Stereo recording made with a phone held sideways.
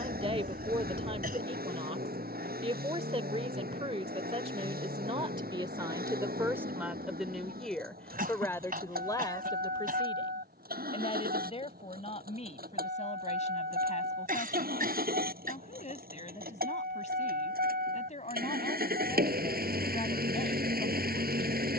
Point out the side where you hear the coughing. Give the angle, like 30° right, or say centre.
70° right.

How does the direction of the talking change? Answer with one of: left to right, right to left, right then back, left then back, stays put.
right to left.